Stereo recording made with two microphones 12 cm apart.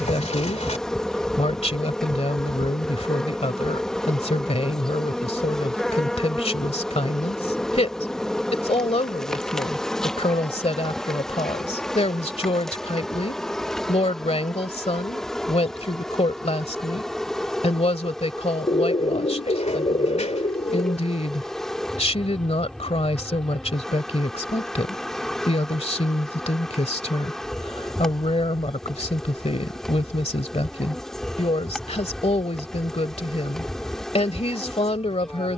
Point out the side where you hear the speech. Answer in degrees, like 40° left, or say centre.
60° left.